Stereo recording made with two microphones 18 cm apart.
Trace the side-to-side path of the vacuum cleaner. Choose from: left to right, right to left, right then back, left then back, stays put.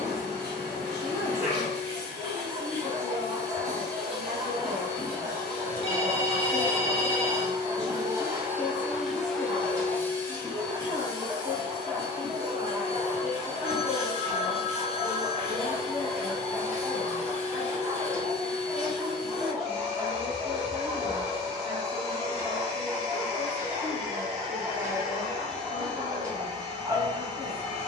right to left.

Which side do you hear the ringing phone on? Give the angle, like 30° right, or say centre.
30° left.